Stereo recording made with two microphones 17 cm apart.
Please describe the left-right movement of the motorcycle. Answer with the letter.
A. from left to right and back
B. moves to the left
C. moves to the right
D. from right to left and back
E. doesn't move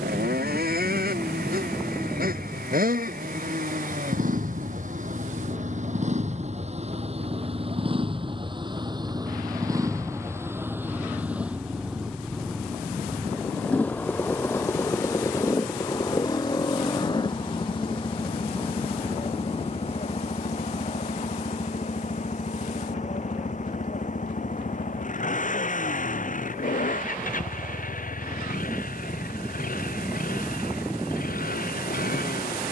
B.